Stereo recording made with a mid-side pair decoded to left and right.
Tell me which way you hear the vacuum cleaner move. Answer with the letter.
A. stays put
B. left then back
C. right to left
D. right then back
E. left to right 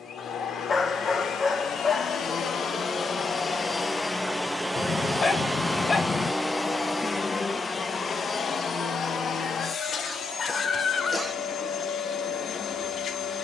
D.